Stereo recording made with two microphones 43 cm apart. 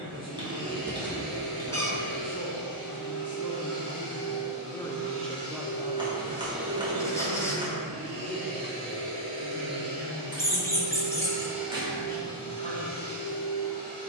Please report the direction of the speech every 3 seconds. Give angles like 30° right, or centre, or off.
40° left, 10° left, 50° right, 80° right, 80° right.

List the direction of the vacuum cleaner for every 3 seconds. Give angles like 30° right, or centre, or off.
40° left, 40° left, 30° right, 20° right, 20° left.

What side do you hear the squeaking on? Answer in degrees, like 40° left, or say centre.
10° left.